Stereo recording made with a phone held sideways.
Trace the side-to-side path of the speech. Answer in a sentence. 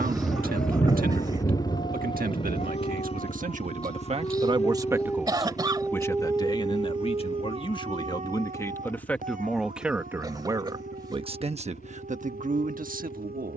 In this clip you hear the speech go left and come back.